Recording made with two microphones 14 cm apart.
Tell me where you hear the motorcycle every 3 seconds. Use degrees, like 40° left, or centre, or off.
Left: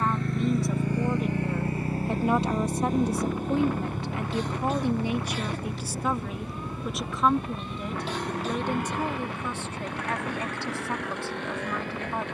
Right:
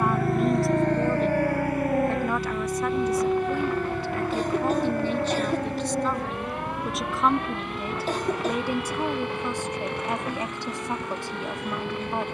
20° left, 50° left, 60° left, 60° left.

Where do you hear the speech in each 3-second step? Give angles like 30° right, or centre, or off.
10° left, 20° left, centre, 20° right.